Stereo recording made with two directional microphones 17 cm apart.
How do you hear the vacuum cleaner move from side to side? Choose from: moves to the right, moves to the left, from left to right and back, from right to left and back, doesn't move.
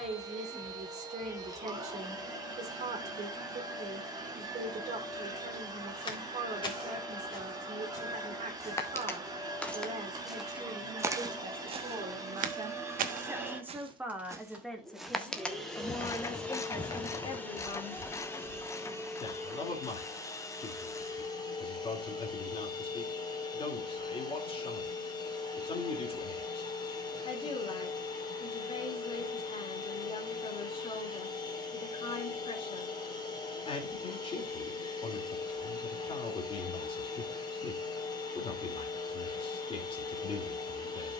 moves to the left.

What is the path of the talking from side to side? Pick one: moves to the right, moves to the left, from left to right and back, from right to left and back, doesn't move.
moves to the left.